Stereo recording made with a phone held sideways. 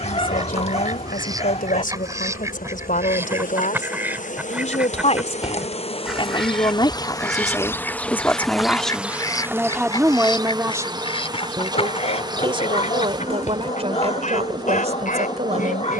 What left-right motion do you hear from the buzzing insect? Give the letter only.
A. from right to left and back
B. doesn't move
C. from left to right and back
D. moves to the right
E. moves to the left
D.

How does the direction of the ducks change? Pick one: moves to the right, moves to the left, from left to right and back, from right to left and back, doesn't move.
moves to the left.